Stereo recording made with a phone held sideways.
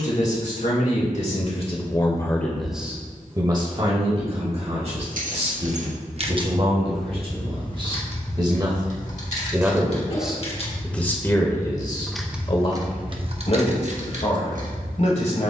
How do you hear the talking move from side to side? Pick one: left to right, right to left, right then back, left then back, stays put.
right then back.